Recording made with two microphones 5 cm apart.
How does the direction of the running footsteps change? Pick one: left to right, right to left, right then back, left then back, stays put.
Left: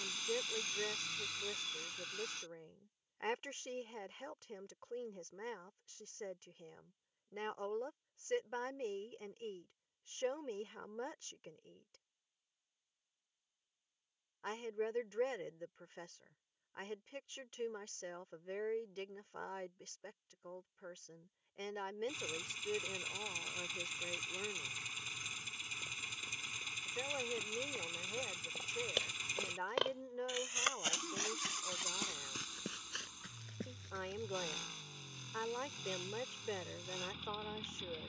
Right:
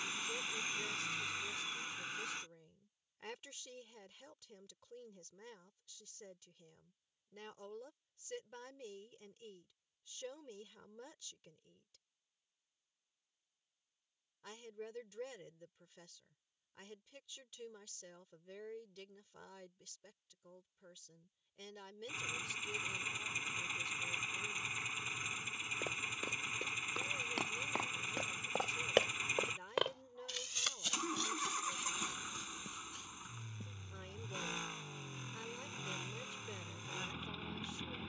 right to left.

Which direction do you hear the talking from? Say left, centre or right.
left.